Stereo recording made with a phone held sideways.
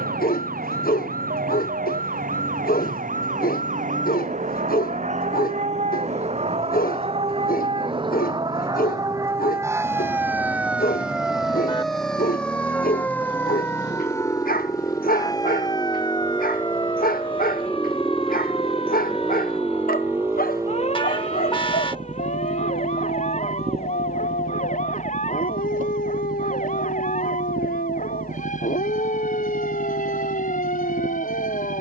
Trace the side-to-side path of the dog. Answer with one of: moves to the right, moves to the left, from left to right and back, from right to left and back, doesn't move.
doesn't move.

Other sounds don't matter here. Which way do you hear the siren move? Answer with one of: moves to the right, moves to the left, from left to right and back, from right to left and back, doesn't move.
moves to the left.